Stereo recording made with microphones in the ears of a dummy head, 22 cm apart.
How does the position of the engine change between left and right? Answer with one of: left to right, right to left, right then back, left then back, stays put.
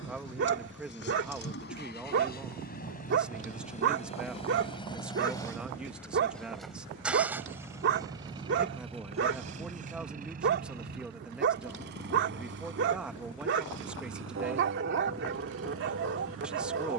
left to right.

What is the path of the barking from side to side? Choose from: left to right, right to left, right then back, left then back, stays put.
stays put.